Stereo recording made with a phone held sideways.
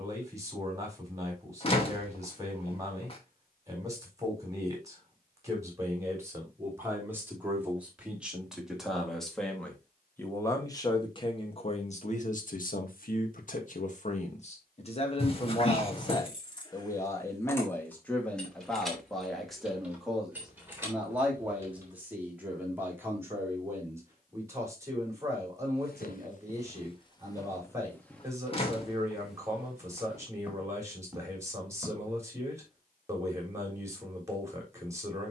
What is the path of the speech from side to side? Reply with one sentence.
You can hear the speech move from right to left and back again.